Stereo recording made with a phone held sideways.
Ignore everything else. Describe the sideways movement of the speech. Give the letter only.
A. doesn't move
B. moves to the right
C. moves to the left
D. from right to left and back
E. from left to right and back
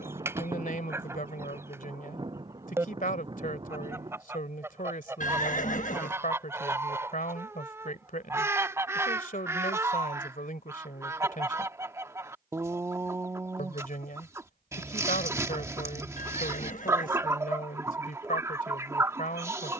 A.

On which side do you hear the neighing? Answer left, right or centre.
left.